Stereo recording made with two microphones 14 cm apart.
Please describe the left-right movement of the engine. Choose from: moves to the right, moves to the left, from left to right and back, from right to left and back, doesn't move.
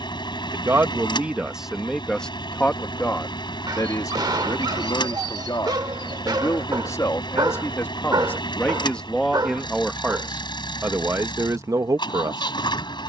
doesn't move.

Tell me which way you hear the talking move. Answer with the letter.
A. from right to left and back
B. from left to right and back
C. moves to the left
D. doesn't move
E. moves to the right
A.